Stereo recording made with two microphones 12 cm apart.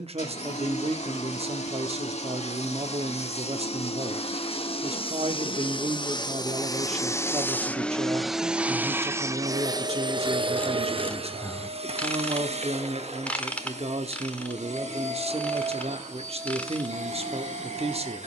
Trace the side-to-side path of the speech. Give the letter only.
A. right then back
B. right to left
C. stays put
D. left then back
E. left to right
C.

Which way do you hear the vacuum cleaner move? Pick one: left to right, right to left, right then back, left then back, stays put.
left to right.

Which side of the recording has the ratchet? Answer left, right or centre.
centre.